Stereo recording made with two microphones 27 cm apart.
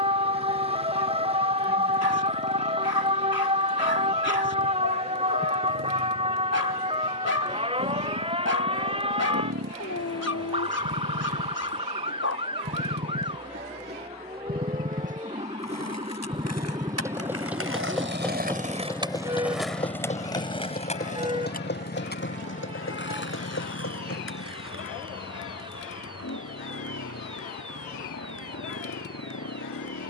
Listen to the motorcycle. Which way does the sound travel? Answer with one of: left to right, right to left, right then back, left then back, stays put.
right to left.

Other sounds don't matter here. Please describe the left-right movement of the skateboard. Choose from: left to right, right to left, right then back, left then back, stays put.
right to left.